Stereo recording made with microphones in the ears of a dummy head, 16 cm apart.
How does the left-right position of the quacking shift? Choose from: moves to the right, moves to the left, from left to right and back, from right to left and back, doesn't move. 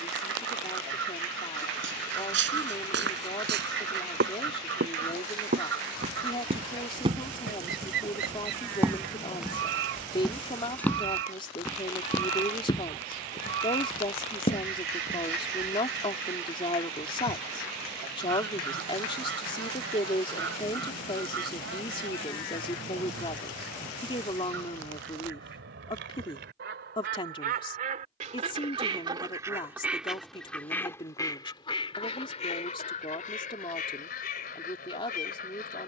moves to the left.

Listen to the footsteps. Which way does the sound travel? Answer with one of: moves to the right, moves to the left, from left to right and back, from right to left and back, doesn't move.
moves to the left.